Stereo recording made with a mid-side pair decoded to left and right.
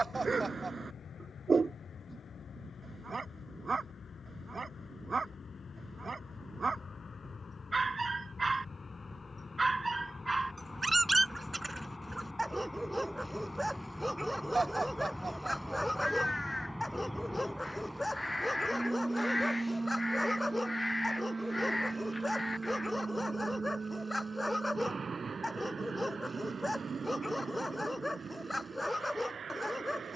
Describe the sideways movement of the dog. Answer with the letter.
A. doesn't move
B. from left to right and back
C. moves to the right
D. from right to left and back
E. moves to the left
E.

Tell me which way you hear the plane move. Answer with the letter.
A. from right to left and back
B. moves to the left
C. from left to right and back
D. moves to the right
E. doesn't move
D.